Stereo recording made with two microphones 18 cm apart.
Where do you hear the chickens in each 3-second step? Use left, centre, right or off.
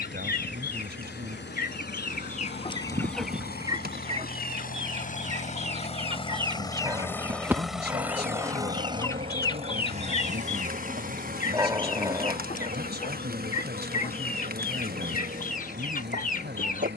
left, right, centre, left, left, left.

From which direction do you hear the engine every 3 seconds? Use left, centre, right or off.
left, left, centre, right, right, right.